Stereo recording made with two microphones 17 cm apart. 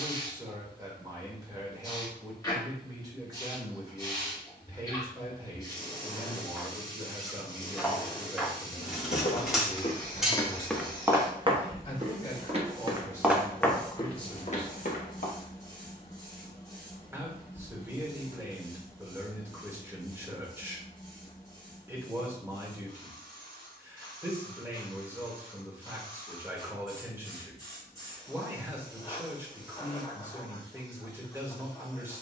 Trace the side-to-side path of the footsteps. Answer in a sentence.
In this clip you hear the footsteps go right and come back.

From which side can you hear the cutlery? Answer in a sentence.
In this clip you hear the cutlery in the centre.